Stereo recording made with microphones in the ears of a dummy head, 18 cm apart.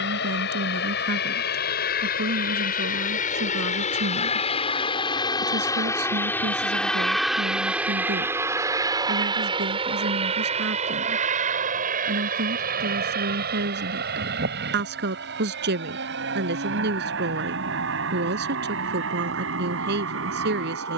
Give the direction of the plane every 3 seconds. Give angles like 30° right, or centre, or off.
50° left, 30° left, centre, 30° right, 50° right, 50° right, 60° right.